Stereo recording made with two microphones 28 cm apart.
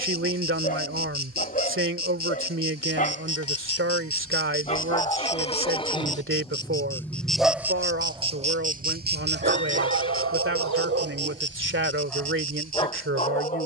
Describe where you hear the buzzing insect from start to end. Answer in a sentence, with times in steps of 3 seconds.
You can hear the buzzing insect on the left from 0 s, in the centre from 6 s and on the right from 9 s.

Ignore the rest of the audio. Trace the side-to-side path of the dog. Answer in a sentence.
In this clip you hear the dog move from left to right and back again.